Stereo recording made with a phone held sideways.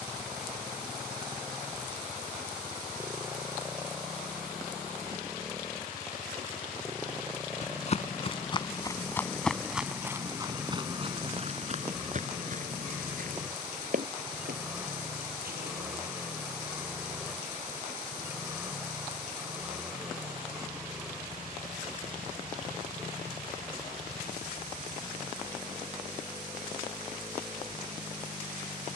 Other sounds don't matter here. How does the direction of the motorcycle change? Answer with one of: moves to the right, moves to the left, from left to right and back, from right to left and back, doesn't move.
doesn't move.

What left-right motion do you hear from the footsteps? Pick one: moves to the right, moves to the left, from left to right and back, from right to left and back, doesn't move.
moves to the right.